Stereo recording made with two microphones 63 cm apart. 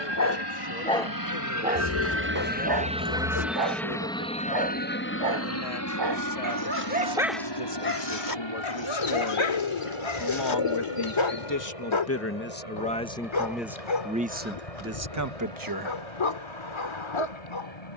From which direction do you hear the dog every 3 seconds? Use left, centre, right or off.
centre, right, centre, left, left, left.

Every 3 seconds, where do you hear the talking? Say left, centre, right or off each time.
left, left, left, left, centre, right.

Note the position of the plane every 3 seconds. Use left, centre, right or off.
right, centre, left, left, left, left.